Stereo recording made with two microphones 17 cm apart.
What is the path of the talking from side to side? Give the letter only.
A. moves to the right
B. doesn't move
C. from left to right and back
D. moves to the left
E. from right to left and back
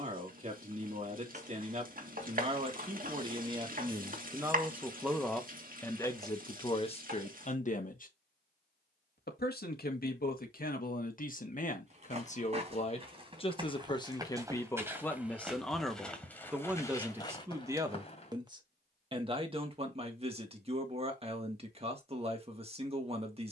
E.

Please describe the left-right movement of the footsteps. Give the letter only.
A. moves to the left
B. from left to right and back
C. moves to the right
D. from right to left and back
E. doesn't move
A.